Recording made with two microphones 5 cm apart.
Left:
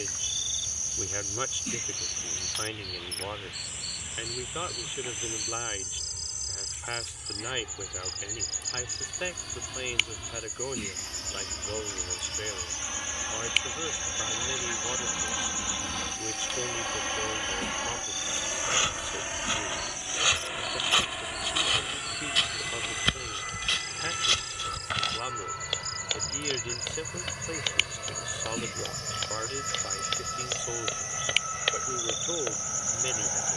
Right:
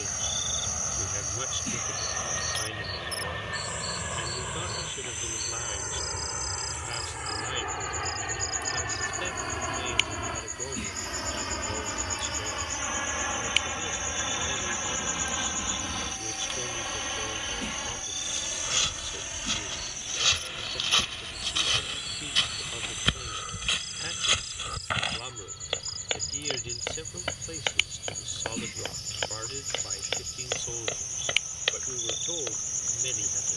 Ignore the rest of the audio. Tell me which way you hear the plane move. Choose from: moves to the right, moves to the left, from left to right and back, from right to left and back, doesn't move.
moves to the left.